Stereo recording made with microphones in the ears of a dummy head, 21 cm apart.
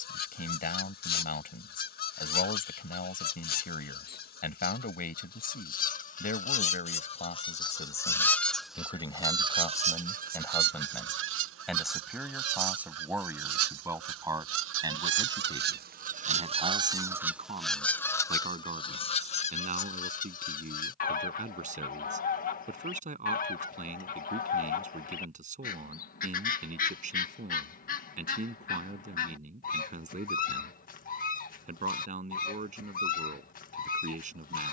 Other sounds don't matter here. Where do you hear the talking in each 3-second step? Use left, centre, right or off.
left, left, left, centre, centre, right, right, right, right, right, right, right.